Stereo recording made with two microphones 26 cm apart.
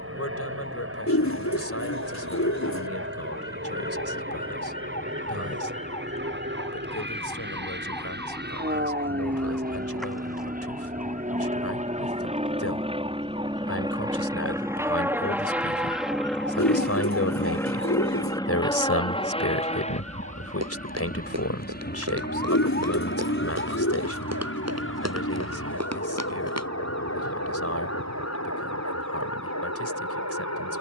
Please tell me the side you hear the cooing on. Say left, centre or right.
left.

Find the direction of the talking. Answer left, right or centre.
left.